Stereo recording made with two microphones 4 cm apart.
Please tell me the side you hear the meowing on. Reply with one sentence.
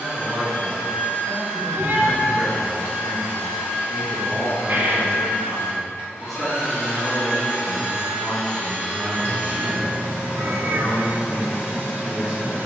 You can hear the meowing on the right.